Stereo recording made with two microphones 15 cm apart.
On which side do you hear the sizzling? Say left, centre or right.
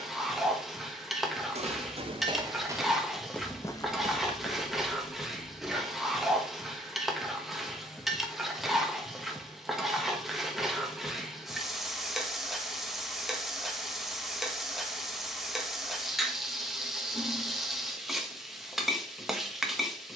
centre.